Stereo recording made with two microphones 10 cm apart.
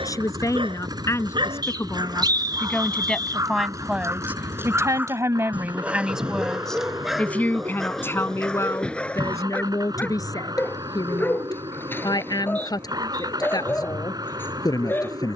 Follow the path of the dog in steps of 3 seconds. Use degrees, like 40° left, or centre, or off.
50° right, 20° right, centre, 20° left, 20° left.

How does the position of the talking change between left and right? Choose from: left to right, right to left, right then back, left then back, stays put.
right then back.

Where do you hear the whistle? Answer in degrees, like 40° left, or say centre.
40° right.